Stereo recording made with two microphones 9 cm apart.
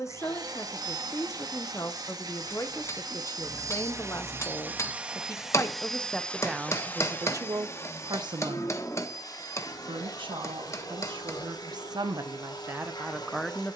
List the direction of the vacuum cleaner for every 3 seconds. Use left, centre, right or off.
right, right, left, left, left.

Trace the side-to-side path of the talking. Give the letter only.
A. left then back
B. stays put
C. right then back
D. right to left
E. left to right
C.